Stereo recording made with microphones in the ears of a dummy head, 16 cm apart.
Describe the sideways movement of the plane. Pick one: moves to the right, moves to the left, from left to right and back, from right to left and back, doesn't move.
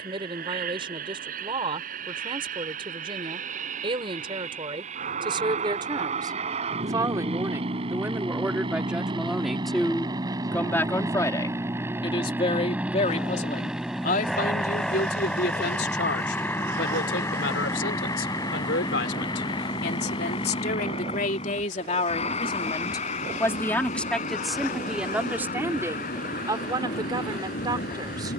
moves to the left.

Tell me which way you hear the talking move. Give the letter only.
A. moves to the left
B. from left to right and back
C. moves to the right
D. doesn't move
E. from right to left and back
E.